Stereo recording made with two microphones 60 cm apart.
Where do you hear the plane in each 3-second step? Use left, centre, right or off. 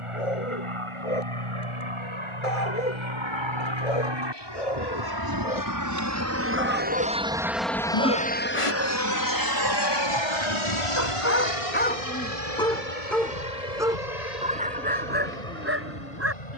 right, right, centre, left, left, left.